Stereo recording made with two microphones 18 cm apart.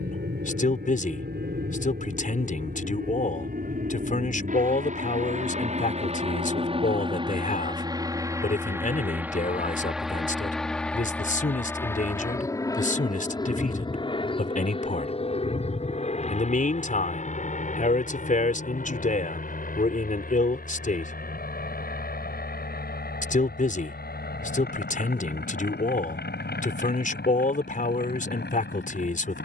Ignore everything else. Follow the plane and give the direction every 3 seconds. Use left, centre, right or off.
right, right, right, centre, left, left, left, left, left, left.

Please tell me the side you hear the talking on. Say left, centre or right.
left.